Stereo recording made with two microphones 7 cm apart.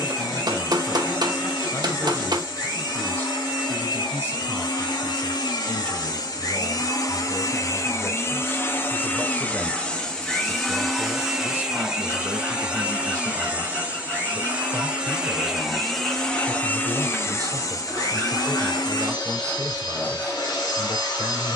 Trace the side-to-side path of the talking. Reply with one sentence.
You can hear the talking go from the left side to the right.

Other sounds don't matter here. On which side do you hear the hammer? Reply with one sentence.
You can hear the hammer on the right.